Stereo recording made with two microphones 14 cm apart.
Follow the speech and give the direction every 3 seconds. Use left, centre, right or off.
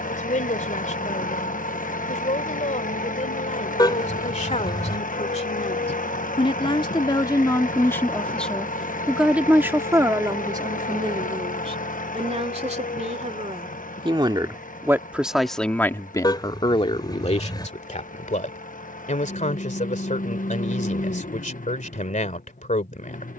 left, left, left, right, right, left, left, left.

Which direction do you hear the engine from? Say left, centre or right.
left.